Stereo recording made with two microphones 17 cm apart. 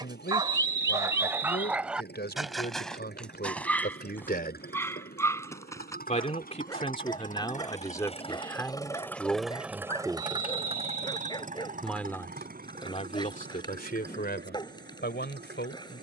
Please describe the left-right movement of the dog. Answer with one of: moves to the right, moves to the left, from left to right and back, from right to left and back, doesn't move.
moves to the left.